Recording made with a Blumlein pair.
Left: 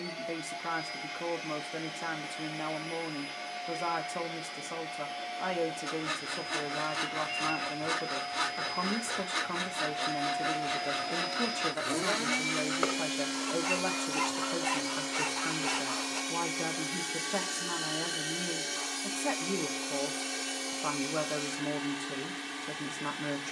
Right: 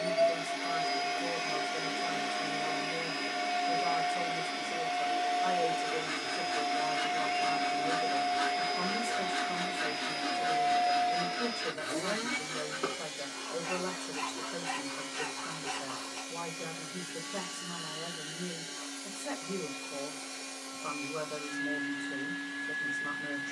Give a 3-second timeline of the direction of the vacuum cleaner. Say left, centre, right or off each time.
right, right, right, centre, left, left, left, left.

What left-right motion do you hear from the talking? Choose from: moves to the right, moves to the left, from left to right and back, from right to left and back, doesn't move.
doesn't move.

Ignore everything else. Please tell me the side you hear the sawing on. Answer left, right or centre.
left.